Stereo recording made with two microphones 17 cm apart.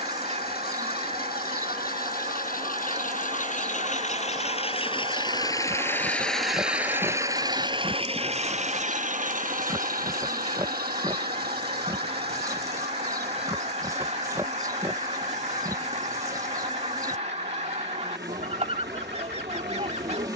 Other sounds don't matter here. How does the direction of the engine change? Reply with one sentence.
You can hear the engine go from the left side to the right.